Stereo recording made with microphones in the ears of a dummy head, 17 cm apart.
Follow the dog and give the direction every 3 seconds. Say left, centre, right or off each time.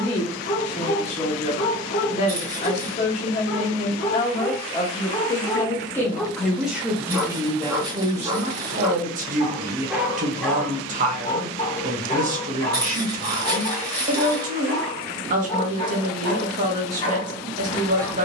left, left, centre, centre, left, left.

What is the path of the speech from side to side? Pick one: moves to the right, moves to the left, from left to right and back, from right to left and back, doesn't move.
moves to the right.